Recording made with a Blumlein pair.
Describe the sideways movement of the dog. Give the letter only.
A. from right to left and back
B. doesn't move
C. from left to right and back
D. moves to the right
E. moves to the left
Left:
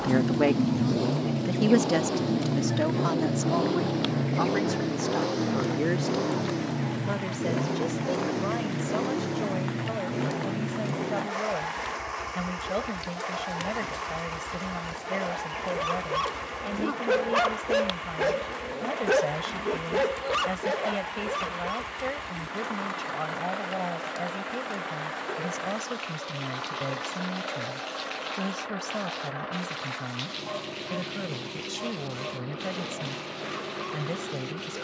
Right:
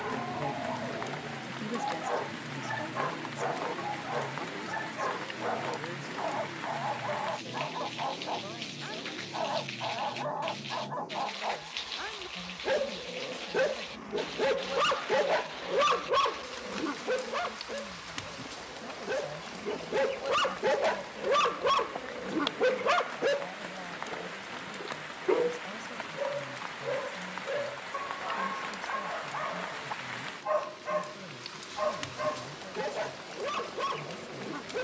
A.